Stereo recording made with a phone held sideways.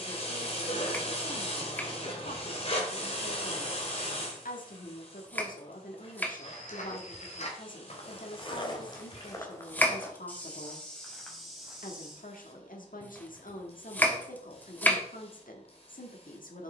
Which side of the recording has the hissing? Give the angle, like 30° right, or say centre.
50° left.